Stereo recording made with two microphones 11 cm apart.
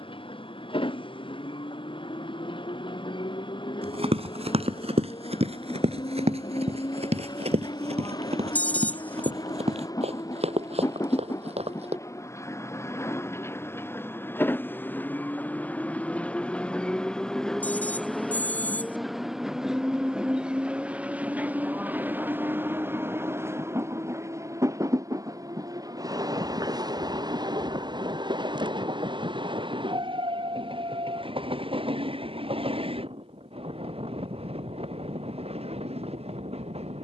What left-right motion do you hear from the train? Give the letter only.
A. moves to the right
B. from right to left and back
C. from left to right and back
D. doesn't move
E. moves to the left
A.